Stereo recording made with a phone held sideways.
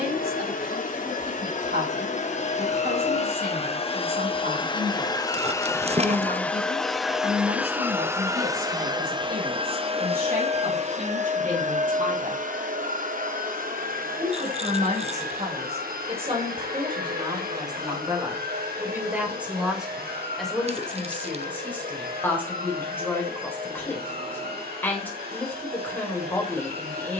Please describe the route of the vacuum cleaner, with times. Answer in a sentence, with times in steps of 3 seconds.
You can hear the vacuum cleaner on the left from 0 s, in the centre from 6 s and on the right from 9 s.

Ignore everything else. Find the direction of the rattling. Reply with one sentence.
You can hear the rattling on the right.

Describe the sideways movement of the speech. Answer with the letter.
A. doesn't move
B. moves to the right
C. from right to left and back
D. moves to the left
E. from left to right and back
D.